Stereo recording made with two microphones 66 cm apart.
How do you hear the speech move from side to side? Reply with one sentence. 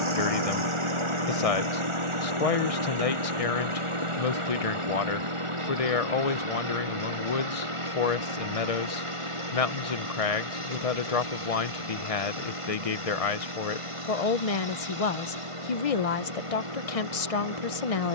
In this clip you hear the speech stay in one place.